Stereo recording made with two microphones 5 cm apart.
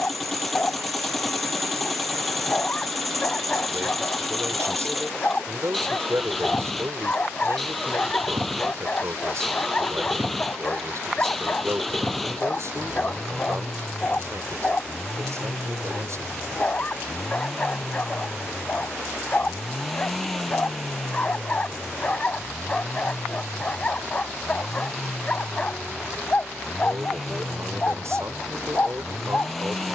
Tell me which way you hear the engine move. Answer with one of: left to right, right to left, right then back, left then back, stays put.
stays put.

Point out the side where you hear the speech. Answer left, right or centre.
right.